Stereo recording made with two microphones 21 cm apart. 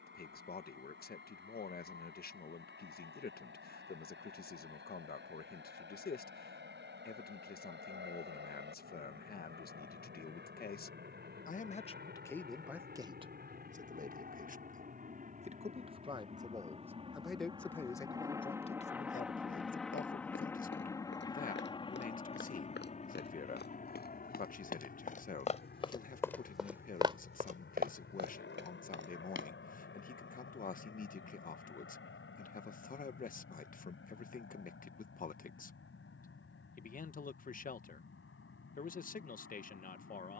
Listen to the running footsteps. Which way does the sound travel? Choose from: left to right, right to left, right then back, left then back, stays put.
left to right.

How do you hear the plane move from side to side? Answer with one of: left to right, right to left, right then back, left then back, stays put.
right to left.